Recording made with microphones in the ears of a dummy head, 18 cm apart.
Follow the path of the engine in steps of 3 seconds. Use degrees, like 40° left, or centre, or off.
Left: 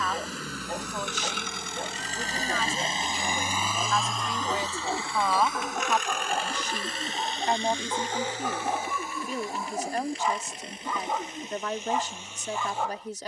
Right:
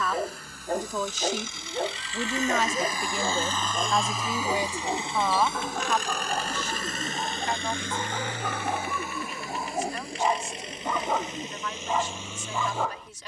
50° left, 10° right, 40° right, 60° right, 60° right.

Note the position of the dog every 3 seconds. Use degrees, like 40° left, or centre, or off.
40° right, 10° right, 10° left, 30° right, 60° right.